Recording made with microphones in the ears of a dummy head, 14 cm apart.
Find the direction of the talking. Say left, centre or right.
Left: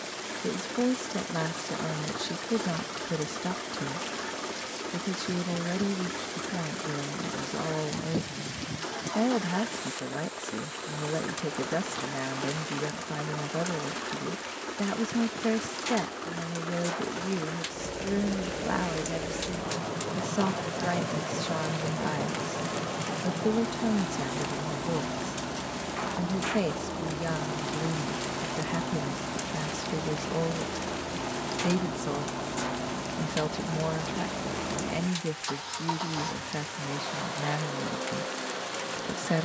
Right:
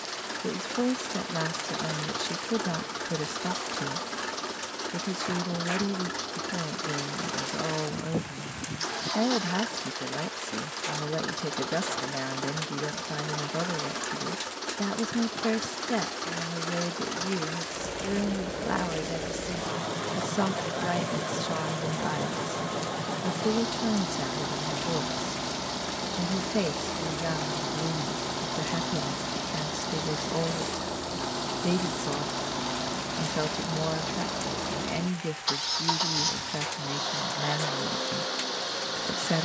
centre.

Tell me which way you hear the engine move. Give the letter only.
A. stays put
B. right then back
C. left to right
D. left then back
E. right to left
A.